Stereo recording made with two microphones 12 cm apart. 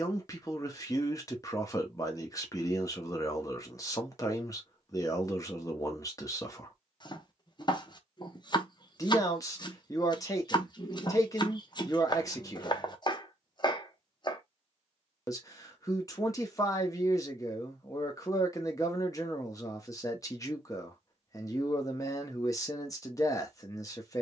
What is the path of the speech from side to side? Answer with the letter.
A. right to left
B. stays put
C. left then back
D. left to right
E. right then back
B.